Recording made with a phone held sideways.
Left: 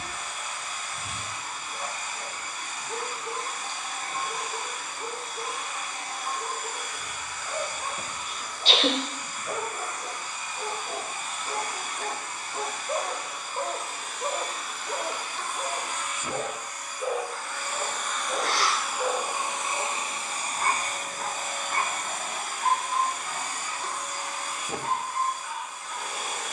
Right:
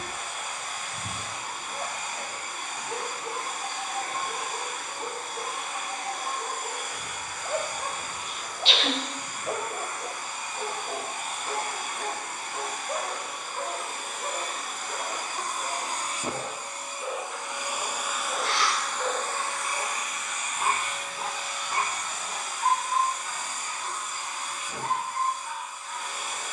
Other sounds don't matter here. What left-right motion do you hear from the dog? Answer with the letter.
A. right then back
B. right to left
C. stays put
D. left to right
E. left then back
E.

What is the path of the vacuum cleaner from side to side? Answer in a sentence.
In this clip you hear the vacuum cleaner move to the left.